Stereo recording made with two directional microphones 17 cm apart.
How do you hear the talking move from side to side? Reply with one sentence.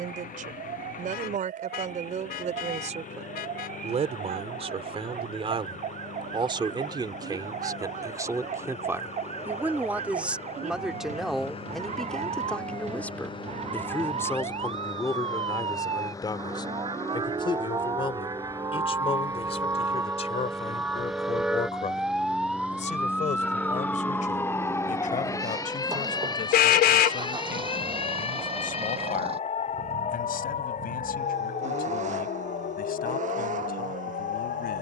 You can hear the talking move from right to left.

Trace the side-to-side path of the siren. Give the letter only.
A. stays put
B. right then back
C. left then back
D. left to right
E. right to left
E.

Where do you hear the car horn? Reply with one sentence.
You can hear the car horn on the left.